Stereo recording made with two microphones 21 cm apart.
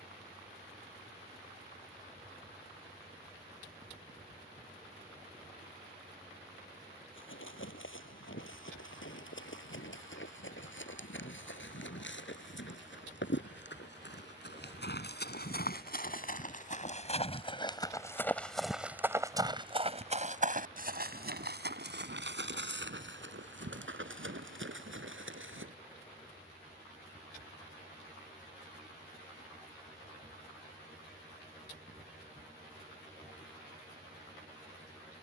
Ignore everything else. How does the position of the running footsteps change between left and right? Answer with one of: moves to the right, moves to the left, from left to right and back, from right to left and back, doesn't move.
moves to the right.